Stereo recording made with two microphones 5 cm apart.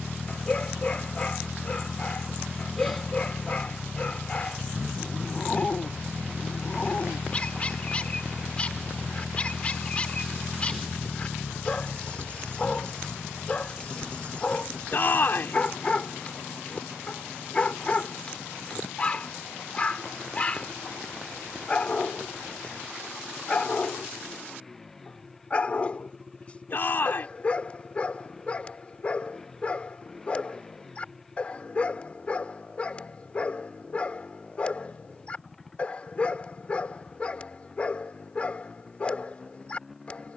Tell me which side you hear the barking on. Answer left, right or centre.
left.